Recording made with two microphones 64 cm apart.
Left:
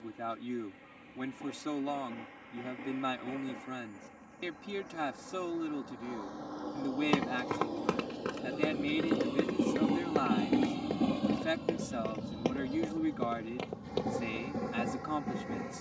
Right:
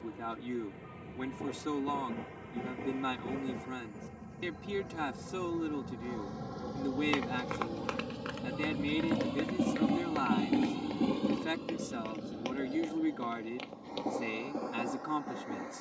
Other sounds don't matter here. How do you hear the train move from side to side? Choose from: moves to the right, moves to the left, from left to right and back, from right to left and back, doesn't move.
moves to the left.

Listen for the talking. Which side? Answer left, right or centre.
centre.